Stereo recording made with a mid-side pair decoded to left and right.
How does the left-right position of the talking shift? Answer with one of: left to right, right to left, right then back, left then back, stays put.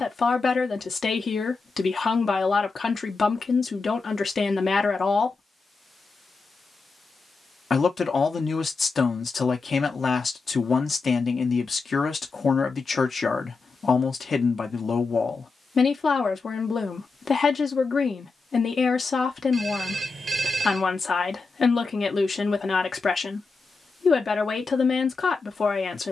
stays put.